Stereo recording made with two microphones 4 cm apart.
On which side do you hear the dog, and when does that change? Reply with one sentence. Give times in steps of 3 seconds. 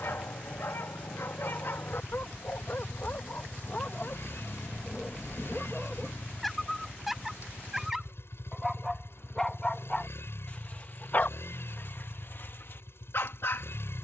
In this clip you hear the dog on the left from 0 s, in the centre from 6 s and on the left from 9 s.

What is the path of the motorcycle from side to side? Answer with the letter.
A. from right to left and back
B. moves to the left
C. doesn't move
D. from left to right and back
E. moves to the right
C.